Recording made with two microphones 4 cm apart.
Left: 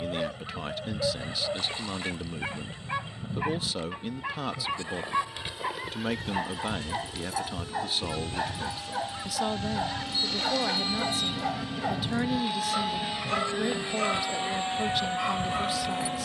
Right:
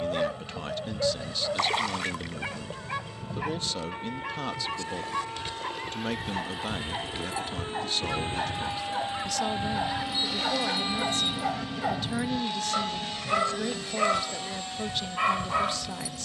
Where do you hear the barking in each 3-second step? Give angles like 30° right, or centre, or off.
10° right, 10° left, 10° left, centre, 20° right, 30° right.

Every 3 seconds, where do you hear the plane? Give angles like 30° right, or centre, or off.
60° right, 50° right, 40° right, 20° right, 20° left, 40° left.